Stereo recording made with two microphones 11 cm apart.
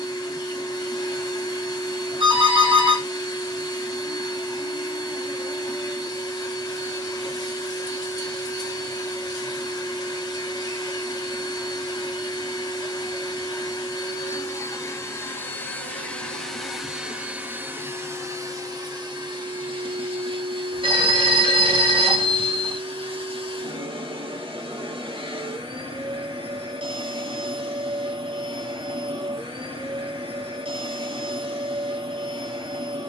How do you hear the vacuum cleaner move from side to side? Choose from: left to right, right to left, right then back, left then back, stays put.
left to right.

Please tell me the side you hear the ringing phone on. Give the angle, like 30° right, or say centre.
50° right.